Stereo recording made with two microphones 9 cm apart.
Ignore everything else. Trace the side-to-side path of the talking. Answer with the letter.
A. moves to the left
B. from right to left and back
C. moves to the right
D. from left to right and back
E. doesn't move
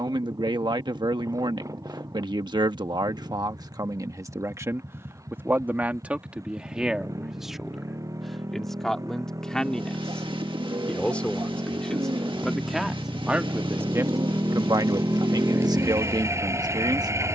B.